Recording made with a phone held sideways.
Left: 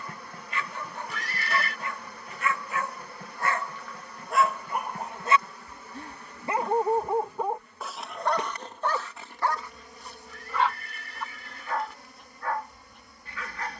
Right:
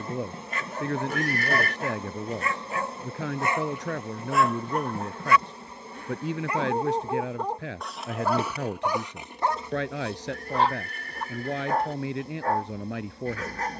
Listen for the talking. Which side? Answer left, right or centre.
right.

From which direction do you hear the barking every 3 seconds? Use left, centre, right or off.
right, centre, centre, right, right.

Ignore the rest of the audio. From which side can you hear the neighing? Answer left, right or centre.
right.